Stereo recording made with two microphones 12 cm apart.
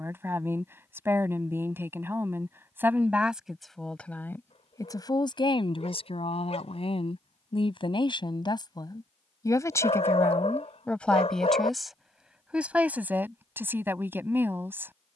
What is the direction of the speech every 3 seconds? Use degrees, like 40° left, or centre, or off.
20° right, 20° left, 40° left, 10° left, 20° right.